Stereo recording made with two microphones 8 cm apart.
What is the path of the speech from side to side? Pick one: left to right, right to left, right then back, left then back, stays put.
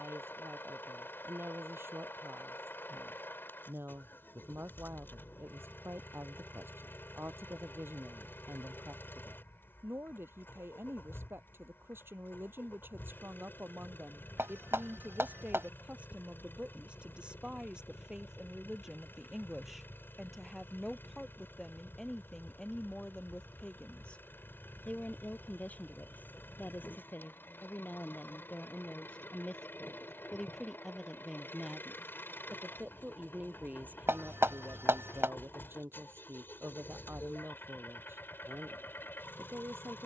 left then back.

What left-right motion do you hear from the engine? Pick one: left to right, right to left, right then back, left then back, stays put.
stays put.